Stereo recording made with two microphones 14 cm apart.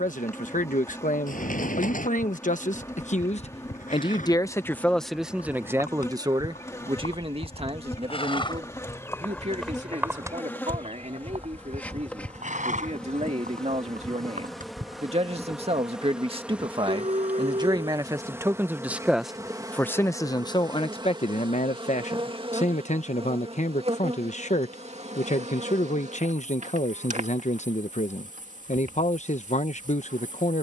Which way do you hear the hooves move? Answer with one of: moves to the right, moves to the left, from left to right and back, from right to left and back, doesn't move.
moves to the right.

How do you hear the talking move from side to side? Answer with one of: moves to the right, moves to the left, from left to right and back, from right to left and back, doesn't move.
from left to right and back.